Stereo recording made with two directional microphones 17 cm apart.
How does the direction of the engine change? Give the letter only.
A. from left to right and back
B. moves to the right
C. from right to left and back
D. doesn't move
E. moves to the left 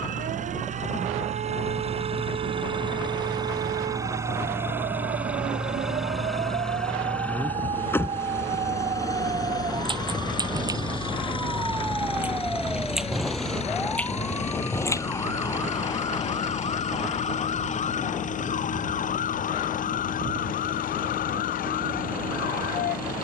E.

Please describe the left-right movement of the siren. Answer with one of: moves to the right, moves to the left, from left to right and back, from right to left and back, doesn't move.
moves to the left.